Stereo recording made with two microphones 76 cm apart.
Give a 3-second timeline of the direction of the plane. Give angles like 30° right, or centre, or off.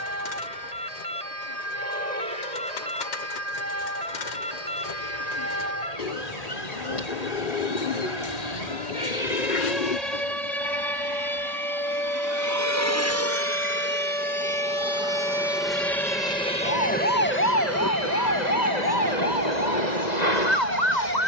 50° right, 50° right, 40° right, 30° right, 20° right, 10° left, 30° left.